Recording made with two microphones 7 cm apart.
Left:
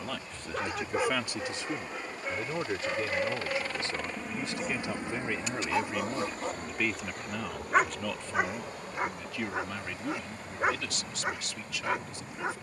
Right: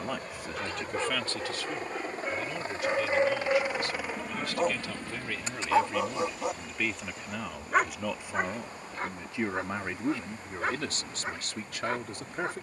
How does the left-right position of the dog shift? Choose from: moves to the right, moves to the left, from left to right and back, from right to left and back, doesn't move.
from left to right and back.